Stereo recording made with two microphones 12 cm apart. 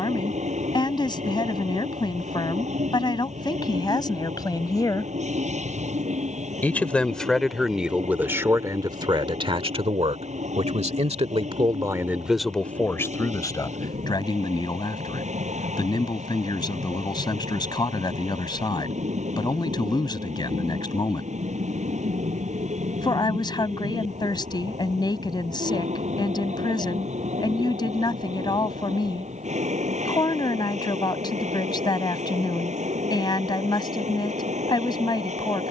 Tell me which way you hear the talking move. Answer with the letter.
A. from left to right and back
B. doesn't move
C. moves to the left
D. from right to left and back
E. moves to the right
A.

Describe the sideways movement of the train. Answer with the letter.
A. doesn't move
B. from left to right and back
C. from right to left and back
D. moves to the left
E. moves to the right
A.